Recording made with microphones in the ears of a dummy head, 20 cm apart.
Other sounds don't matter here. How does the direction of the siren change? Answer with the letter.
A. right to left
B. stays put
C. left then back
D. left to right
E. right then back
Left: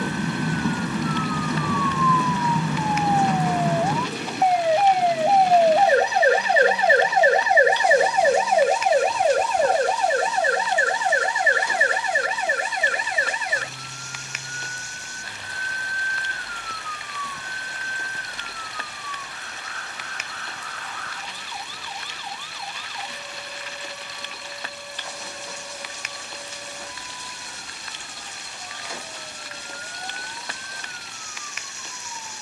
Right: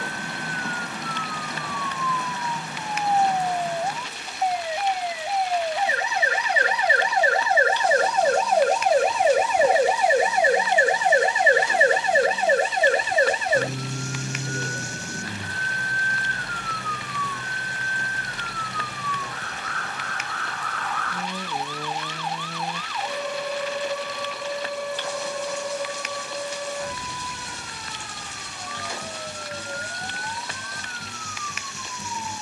D.